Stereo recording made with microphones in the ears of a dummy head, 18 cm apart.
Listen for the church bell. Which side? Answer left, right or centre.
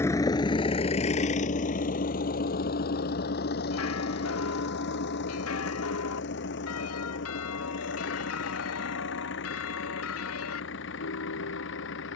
left.